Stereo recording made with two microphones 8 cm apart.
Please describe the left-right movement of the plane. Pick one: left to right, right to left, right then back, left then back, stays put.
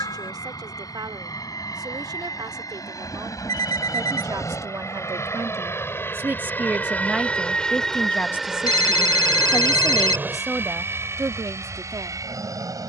left to right.